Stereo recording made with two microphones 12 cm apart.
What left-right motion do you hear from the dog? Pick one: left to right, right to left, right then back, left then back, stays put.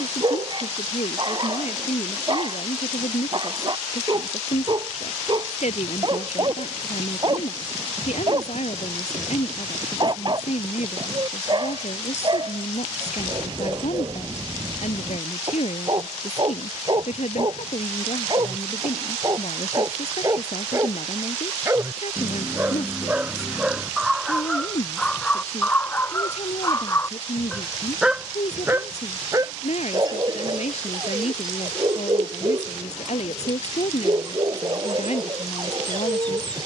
left then back.